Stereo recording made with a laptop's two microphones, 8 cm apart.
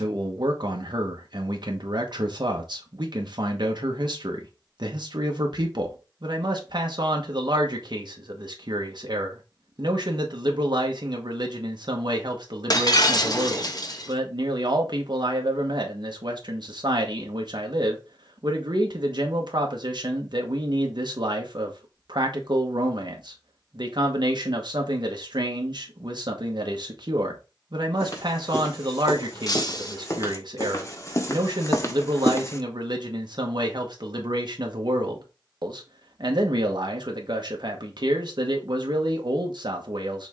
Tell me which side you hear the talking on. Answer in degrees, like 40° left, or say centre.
60° right.